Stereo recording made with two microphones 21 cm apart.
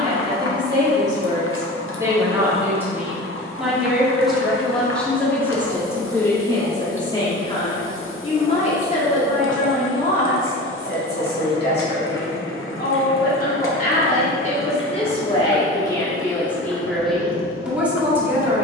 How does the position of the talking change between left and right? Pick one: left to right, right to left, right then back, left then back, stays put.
left then back.